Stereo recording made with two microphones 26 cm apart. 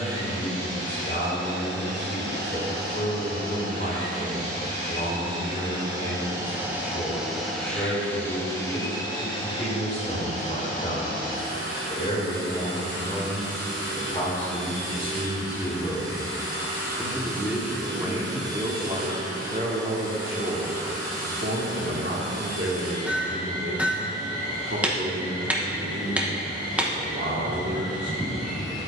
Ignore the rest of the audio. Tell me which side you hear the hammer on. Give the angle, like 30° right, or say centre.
10° right.